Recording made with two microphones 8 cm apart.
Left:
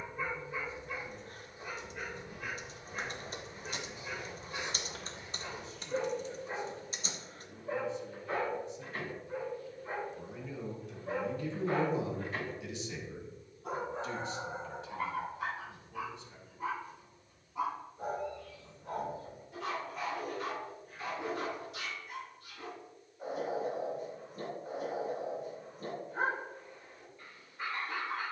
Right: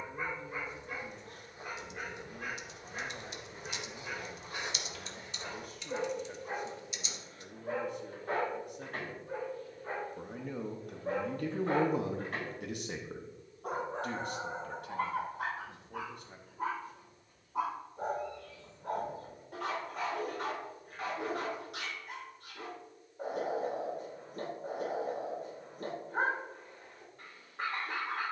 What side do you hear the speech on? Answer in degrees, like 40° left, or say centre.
50° right.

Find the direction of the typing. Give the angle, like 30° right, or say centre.
40° left.